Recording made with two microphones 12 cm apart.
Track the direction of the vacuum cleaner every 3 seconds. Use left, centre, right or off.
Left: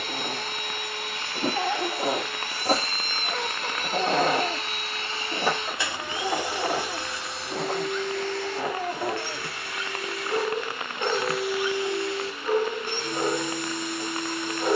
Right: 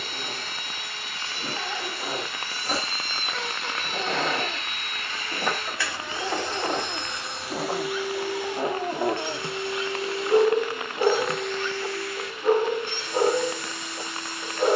left, left, centre, centre, left.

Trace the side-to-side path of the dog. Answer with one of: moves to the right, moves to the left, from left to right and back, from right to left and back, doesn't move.
moves to the right.